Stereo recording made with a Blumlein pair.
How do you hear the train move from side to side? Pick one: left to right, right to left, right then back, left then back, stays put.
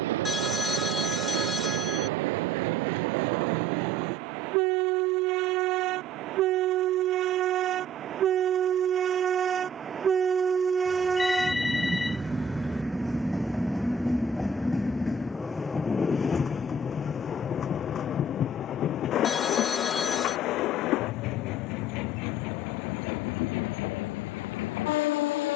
right to left.